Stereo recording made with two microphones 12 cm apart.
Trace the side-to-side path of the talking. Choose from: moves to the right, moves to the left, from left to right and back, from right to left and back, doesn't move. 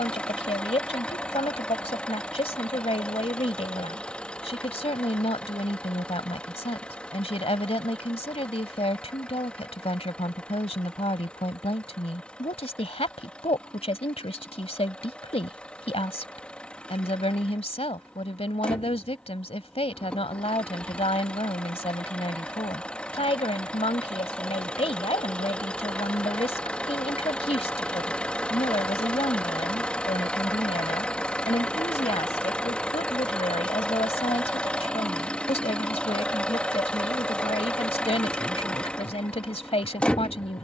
doesn't move.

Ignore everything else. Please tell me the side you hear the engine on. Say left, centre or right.
centre.